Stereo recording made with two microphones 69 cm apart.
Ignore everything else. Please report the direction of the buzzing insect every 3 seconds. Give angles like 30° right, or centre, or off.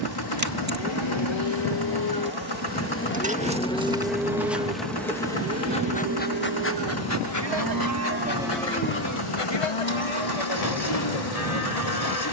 20° right, centre, 30° left, 50° left.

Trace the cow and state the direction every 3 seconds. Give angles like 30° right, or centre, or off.
40° left, 10° right, 20° right, 50° left.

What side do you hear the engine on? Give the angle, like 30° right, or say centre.
30° left.